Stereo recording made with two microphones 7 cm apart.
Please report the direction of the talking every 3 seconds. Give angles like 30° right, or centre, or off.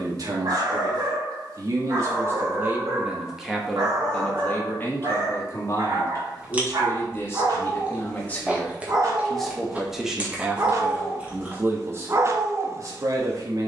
40° right, 20° left, 30° left, 10° right, 40° right.